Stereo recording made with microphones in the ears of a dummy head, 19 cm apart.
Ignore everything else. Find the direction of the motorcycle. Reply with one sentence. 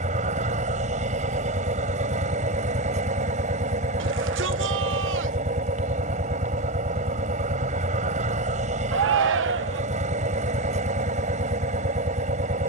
You can hear the motorcycle on the right.